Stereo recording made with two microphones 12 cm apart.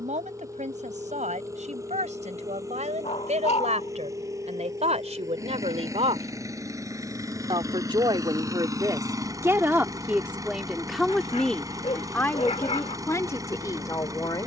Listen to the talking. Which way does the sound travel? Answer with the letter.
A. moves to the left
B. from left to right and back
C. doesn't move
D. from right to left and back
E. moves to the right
A.